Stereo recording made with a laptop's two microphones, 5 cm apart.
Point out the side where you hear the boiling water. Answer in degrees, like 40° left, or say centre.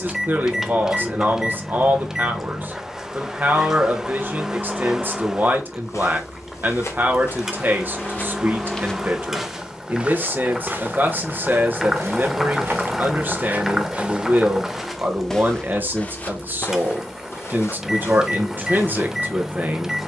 10° right.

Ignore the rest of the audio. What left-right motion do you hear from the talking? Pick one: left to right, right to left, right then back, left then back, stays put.
stays put.